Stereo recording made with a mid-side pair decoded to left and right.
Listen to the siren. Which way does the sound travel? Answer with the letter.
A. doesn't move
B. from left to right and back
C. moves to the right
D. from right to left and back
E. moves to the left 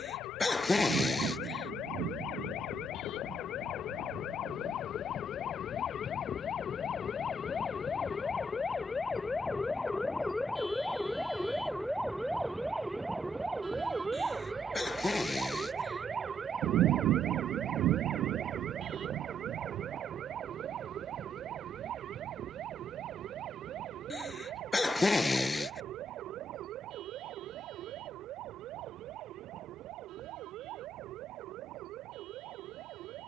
C.